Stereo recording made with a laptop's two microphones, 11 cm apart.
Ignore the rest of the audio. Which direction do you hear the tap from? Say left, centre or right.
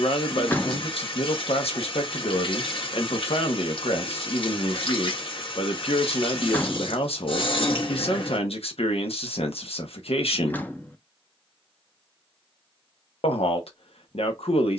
left.